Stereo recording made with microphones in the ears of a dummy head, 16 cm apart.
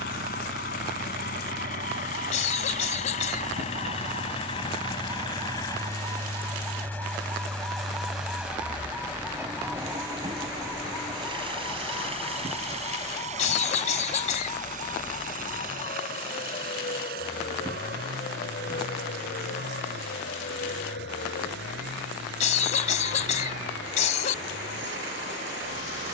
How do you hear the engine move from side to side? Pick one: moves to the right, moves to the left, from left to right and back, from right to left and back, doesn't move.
moves to the right.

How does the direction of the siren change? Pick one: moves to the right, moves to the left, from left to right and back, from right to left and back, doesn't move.
moves to the left.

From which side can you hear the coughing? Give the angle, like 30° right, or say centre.
40° left.